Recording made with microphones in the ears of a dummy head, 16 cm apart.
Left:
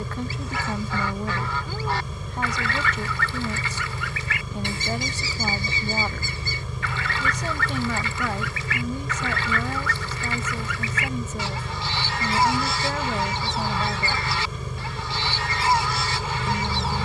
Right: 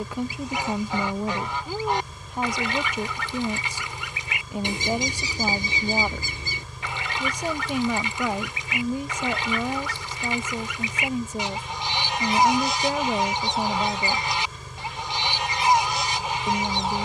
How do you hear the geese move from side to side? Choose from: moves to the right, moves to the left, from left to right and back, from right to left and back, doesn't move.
doesn't move.